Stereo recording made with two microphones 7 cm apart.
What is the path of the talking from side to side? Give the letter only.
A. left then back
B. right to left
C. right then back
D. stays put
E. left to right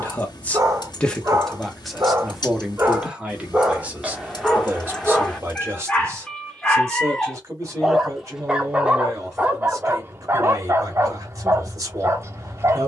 E.